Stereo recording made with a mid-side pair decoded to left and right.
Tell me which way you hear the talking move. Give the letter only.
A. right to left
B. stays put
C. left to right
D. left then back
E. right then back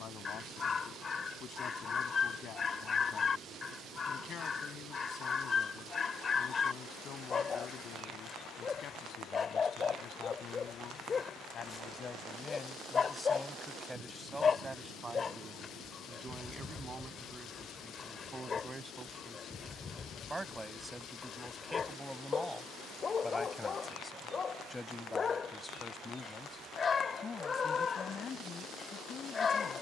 E.